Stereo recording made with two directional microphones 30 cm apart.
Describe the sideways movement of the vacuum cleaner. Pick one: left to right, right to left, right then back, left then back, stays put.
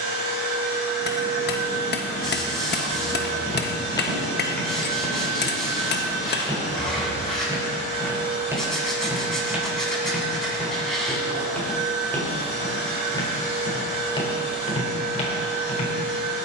stays put.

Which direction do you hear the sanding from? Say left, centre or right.
centre.